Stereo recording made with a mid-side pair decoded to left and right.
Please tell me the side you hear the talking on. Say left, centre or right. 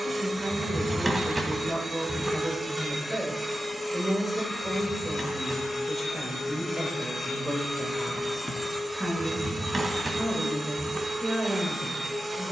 centre.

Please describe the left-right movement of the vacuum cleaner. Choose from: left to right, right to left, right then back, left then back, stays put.
left then back.